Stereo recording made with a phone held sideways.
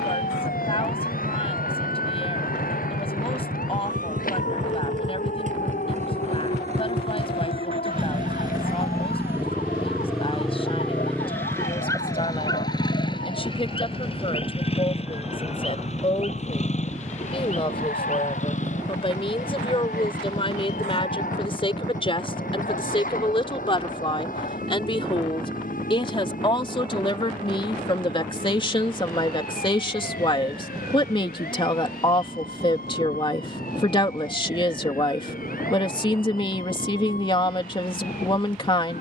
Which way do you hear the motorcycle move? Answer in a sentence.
In this clip you hear the motorcycle move from right to left.